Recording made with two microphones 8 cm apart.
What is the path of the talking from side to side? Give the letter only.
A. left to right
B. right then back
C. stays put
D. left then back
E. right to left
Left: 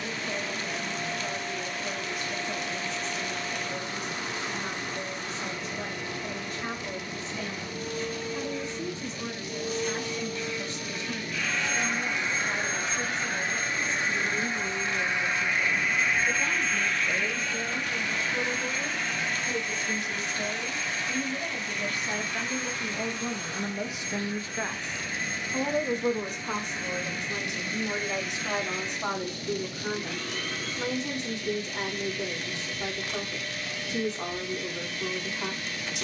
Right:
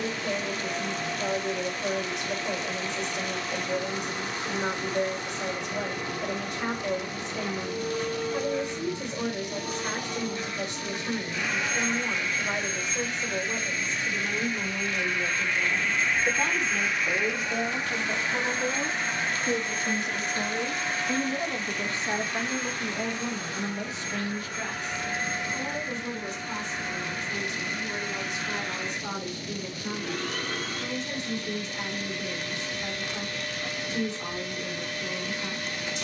E.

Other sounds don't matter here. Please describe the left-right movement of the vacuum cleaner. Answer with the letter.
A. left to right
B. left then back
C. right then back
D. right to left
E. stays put
B.